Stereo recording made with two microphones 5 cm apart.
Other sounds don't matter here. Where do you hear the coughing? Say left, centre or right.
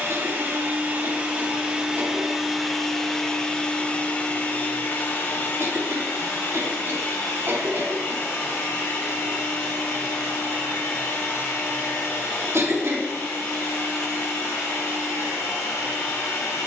right.